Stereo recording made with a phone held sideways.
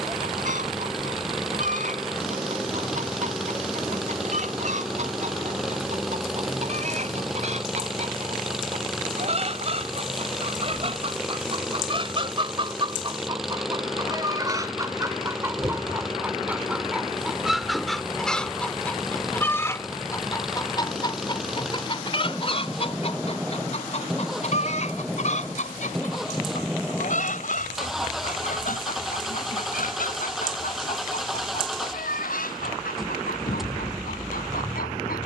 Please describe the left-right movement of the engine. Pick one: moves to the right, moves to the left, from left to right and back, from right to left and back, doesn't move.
doesn't move.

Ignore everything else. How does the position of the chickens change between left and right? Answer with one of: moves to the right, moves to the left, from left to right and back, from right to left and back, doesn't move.
moves to the left.